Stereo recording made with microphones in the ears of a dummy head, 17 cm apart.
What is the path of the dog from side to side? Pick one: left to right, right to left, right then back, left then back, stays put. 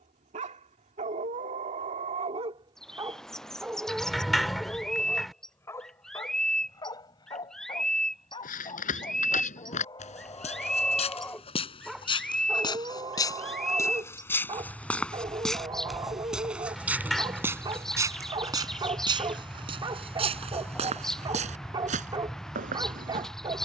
left then back.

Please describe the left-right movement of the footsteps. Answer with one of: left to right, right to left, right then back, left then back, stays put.
left to right.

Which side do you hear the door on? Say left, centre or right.
centre.